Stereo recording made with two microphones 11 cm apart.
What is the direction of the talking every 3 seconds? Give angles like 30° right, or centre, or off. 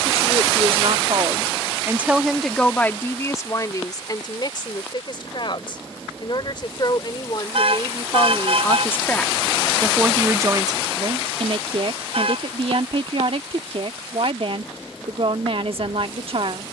30° right, 40° left, 40° left, 30° right, 60° right, 60° right.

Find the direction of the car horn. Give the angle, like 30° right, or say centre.
60° right.